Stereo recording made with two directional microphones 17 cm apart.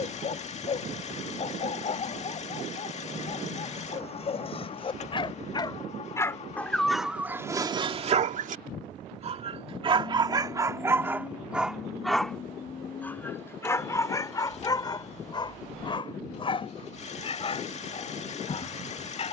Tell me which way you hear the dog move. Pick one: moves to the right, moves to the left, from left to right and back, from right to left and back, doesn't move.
from left to right and back.